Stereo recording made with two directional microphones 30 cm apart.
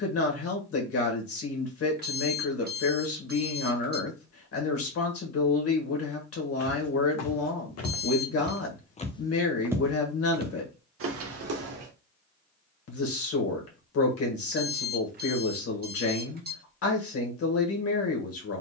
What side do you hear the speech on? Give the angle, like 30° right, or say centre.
50° left.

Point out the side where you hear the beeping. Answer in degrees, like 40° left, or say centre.
30° right.